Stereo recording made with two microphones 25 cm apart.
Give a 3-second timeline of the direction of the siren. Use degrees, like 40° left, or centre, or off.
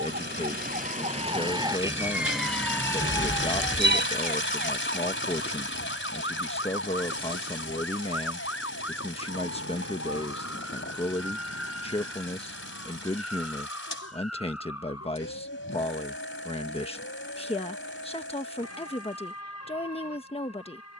20° right, 30° left, 60° left, 70° left, 70° left, 70° left, 70° left.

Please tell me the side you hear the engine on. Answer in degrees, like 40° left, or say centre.
50° left.